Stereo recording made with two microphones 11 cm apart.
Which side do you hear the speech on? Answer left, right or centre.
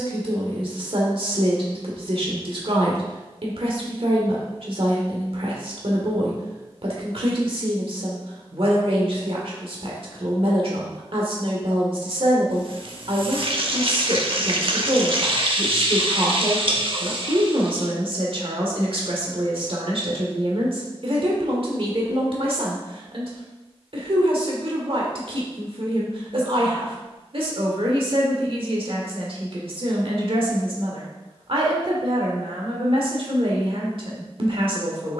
right.